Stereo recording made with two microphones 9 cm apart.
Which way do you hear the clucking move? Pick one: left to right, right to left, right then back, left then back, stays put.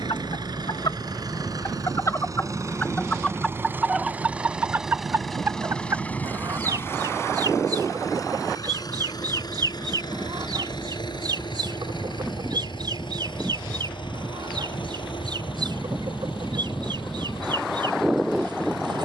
left to right.